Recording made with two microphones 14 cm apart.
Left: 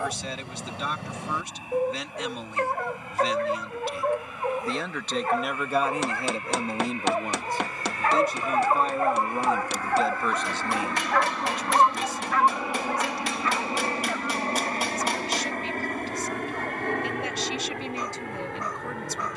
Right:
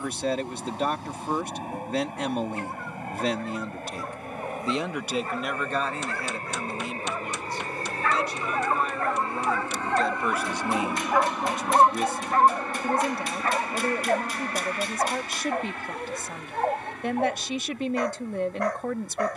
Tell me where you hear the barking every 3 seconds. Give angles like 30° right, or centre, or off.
70° left, 60° left, 40° left, centre, 40° right, 60° right, 70° right.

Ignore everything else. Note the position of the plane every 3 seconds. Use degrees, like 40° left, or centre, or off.
60° right, 50° right, 40° right, 20° right, 20° left, 50° left, 70° left.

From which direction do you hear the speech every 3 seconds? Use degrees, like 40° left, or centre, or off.
50° right, 20° right, 40° left, centre, 50° right, 50° right, 50° right.